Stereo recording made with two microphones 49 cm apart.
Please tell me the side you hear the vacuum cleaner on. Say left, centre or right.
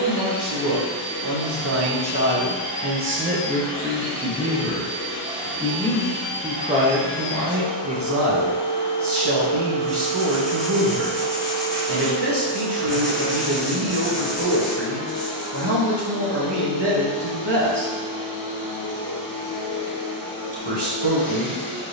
left.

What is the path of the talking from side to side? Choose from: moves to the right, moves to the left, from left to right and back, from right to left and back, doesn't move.
from right to left and back.